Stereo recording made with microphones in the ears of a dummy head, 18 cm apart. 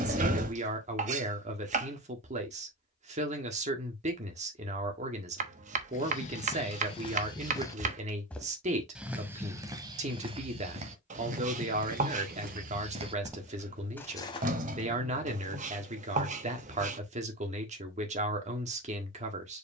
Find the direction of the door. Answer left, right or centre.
right.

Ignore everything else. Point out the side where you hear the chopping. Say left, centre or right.
right.